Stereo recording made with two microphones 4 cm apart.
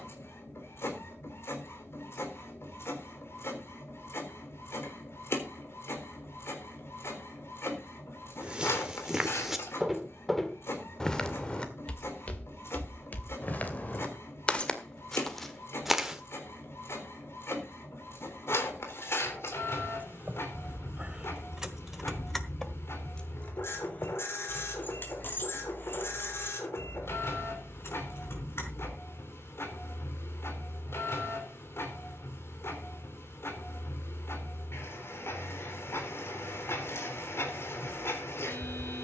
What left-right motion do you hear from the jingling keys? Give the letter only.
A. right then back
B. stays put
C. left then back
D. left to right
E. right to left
E.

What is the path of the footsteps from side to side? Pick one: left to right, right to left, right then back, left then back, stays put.
left then back.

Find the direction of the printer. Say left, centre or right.
left.